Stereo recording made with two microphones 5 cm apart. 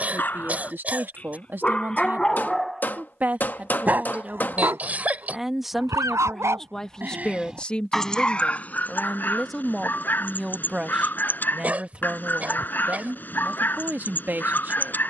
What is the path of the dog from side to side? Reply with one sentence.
You can hear the dog move from left to right and back again.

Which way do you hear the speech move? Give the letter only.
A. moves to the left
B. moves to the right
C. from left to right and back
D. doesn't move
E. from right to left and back
E.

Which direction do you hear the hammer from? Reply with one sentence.
In this clip you hear the hammer on the left.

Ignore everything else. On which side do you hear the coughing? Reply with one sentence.
In this clip you hear the coughing on the right.